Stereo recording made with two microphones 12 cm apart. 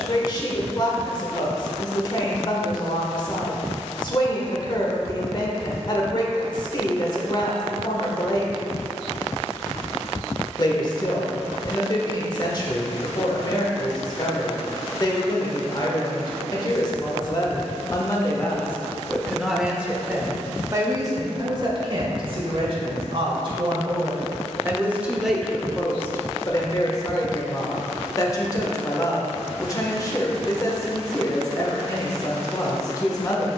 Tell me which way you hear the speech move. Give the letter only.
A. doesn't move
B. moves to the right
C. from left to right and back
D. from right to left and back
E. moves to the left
C.